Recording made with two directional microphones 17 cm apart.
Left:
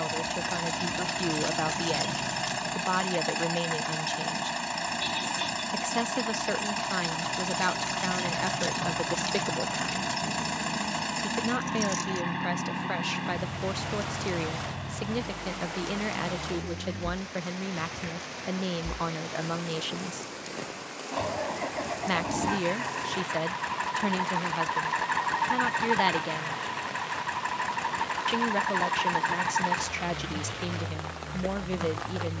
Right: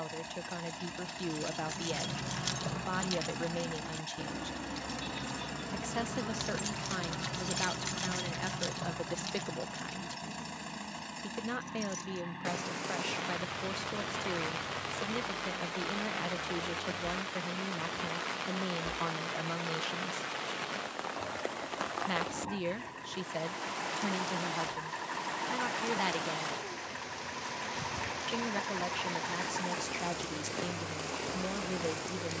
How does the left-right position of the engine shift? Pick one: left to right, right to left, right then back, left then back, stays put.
stays put.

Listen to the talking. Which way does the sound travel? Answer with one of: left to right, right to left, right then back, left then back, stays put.
stays put.